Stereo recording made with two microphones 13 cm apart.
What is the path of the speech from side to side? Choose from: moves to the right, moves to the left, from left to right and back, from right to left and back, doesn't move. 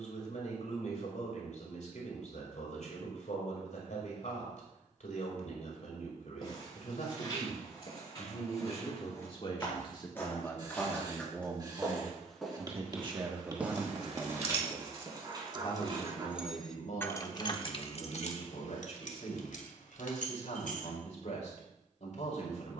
from left to right and back.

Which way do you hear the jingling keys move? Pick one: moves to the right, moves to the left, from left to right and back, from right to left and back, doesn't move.
moves to the left.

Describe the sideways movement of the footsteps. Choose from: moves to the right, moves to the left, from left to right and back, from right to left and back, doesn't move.
moves to the right.